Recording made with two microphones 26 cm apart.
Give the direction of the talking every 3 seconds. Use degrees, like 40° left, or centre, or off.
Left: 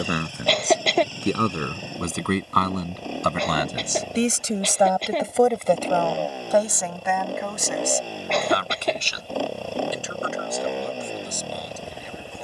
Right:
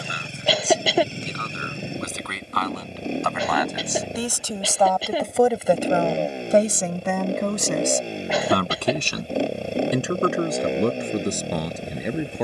60° left, 20° left, 40° right, 70° right.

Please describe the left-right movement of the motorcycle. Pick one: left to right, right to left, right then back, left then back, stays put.
stays put.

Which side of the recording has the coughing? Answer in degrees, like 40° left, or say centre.
10° right.